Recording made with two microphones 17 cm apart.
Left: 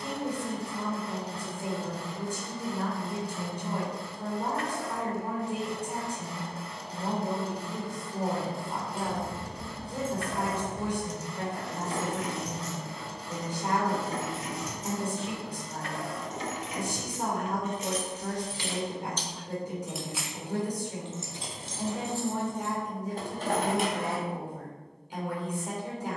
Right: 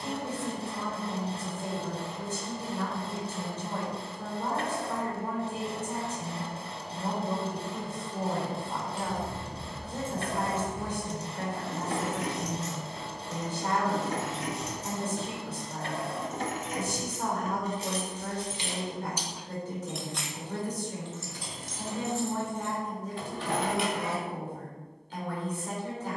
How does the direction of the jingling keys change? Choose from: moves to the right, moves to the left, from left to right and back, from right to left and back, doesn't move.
from left to right and back.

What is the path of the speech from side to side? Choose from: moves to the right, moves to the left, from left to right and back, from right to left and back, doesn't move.
doesn't move.